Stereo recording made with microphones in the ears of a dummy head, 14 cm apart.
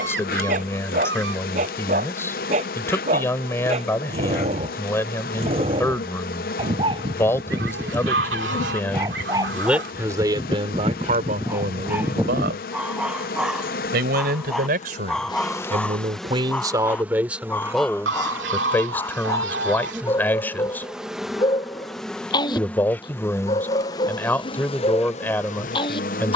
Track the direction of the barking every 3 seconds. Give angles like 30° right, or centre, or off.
50° right, 40° right, 30° right, 20° right, centre, 10° left, 20° left, 30° left, 30° left.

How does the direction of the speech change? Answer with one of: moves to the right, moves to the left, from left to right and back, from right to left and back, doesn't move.
from left to right and back.